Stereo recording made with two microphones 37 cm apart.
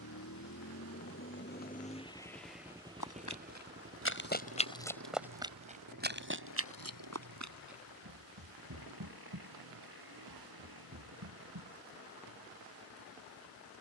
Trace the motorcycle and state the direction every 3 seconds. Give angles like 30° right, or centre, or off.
30° left, 40° right, 60° right, 70° right, 70° right.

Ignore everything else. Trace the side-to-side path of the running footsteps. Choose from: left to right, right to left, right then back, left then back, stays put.
left to right.